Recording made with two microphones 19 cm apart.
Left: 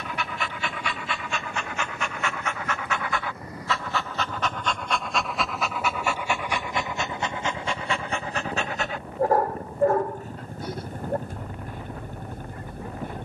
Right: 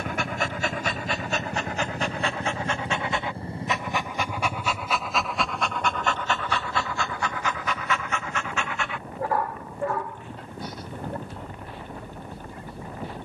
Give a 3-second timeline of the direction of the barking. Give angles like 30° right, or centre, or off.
40° right, 10° right, 30° left, 50° left, 60° left.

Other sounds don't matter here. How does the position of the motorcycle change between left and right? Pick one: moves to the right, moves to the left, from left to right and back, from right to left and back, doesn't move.
moves to the left.